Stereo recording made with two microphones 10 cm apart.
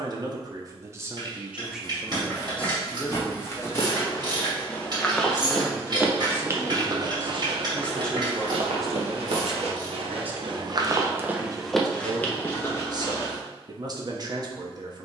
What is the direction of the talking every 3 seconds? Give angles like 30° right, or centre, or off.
10° right, 30° left, 10° left, 20° right, 40° right.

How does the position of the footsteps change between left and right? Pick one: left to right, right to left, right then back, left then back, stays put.
right then back.